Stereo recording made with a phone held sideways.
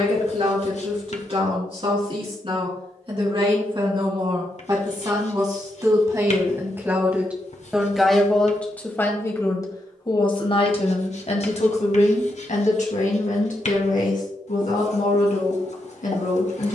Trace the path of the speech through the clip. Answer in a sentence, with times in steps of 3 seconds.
In this clip you hear the speech on the right from 0 s, in the centre from 6 s and on the left from 9 s.